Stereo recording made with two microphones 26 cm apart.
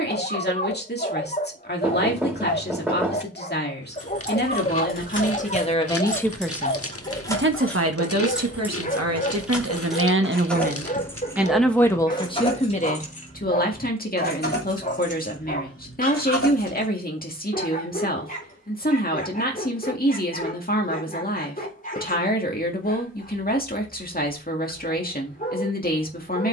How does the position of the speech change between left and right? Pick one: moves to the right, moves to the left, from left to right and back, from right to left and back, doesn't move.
from left to right and back.